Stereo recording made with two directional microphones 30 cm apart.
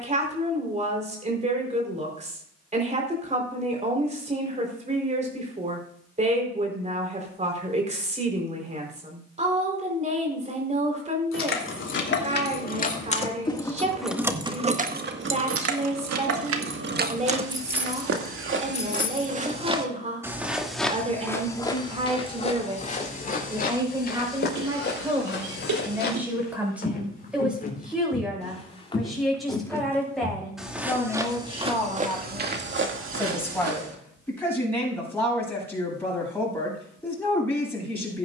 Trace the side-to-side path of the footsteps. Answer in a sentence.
You can hear the footsteps move from right to left and back again.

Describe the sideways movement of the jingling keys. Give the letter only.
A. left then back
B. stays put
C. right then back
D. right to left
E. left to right
C.